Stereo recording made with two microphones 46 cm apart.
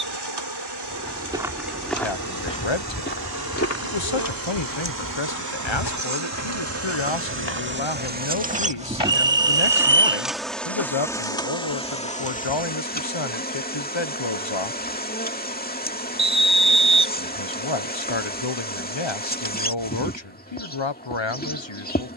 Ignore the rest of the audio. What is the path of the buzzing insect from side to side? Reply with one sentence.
You can hear the buzzing insect travel towards the left.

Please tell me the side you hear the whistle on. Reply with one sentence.
In this clip you hear the whistle on the right.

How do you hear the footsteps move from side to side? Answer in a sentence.
In this clip you hear the footsteps move from right to left.